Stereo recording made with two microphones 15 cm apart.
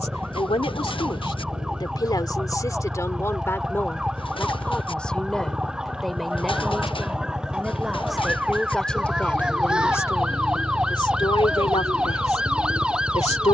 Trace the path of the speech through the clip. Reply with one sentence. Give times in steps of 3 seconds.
You can hear the speech on the left from 0 s, in the centre from 3 s and on the left from 9 s.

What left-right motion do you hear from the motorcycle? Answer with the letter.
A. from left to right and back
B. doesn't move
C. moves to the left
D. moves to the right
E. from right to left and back
B.